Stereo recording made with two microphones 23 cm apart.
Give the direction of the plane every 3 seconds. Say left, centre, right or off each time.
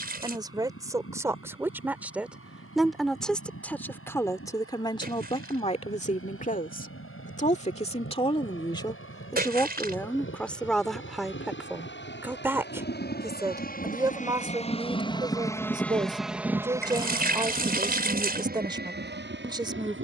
left, left, left, left, left, centre, right.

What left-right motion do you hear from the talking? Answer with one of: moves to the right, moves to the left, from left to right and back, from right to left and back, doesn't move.
from right to left and back.